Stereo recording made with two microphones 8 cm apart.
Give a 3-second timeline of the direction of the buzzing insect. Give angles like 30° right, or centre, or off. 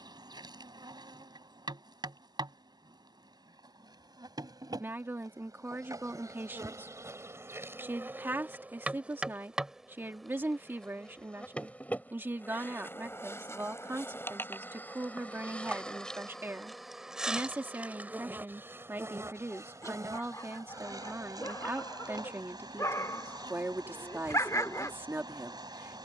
60° right, 60° right, 30° right, centre, 30° left, centre, 40° right, 60° right, 60° right.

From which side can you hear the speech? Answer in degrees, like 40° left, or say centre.
30° right.